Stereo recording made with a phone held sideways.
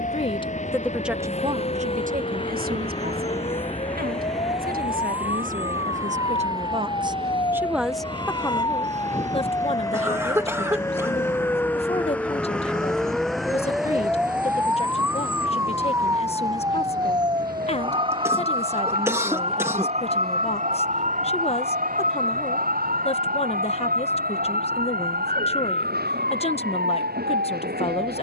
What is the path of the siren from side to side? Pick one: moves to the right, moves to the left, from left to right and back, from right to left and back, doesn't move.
moves to the right.